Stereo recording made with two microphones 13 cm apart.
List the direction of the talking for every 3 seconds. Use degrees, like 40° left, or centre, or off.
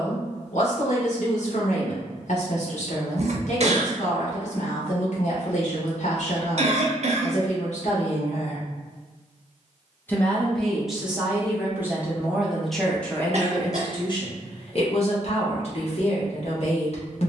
60° left, 60° left, 60° left, centre, 20° left, 50° left.